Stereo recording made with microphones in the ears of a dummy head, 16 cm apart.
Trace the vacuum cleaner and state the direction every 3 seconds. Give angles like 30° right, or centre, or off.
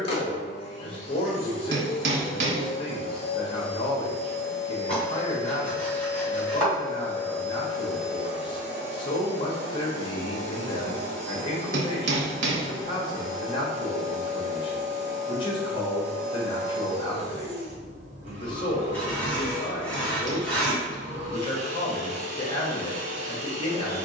30° left, 30° left, 10° left, 30° right, 40° right, 40° right, 40° right, 40° right.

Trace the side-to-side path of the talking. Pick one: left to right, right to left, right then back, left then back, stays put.
stays put.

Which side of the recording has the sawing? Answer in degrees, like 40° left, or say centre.
10° left.